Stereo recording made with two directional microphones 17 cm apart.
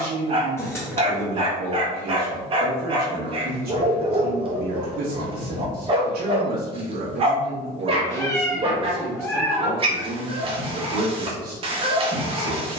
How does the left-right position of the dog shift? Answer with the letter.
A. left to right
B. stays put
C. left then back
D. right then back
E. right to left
B.